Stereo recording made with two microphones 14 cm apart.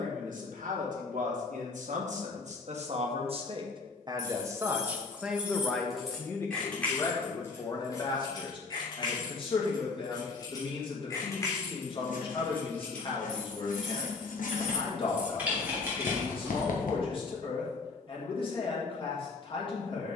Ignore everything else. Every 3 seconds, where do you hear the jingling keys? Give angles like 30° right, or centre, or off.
off, 10° right, 20° left, 30° left, 10° left, 10° right, off.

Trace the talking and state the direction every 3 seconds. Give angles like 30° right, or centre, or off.
70° right, 20° right, 30° left, 40° left, 40° left, 40° left, 40° left.